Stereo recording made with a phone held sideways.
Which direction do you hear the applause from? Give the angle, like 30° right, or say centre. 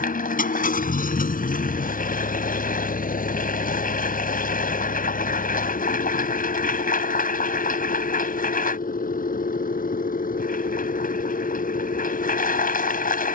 80° left.